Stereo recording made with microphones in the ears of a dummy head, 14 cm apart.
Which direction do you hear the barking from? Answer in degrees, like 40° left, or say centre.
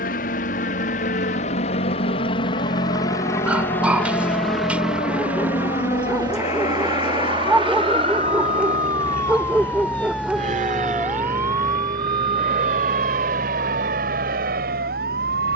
10° right.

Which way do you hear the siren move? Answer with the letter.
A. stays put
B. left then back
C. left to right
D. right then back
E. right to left
C.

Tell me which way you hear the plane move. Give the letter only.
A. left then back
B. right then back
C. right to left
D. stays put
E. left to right
E.